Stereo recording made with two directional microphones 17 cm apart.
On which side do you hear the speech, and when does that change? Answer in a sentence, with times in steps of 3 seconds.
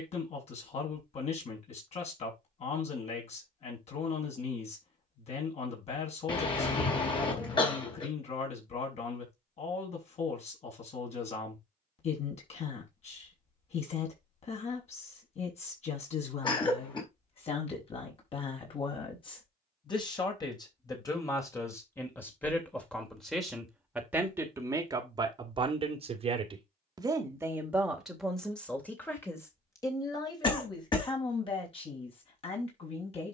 In this clip you hear the speech on the left from 0 s, in the centre from 21 s, on the right from 24 s, in the centre from 27 s and on the left from 30 s.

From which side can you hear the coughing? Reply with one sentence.
You can hear the coughing on the left.